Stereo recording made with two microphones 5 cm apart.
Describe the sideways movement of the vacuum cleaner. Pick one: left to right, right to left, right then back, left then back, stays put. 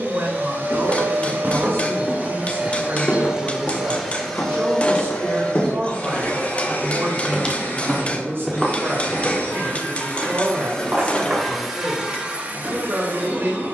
left then back.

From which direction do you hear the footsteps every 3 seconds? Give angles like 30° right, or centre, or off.
20° right, 60° left, 20° left, 30° right, off.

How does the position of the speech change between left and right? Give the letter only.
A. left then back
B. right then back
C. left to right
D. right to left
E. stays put
E.